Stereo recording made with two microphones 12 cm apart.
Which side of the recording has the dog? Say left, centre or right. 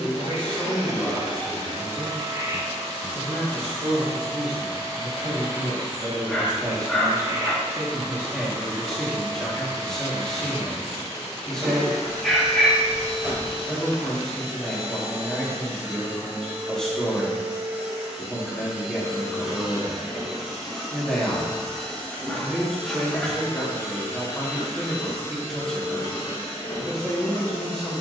centre.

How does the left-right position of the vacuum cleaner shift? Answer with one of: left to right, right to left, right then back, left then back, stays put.
right to left.